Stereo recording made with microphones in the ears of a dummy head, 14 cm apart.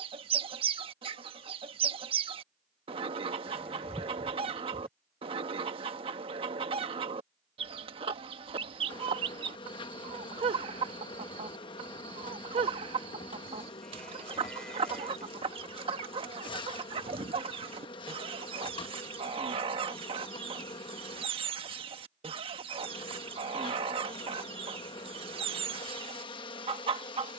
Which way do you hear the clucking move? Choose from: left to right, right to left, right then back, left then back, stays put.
stays put.